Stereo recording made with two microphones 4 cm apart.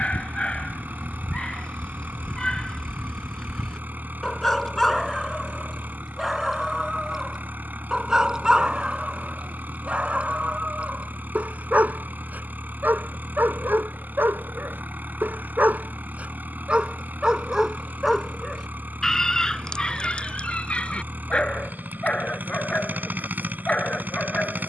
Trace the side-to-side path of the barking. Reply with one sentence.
In this clip you hear the barking go right and come back.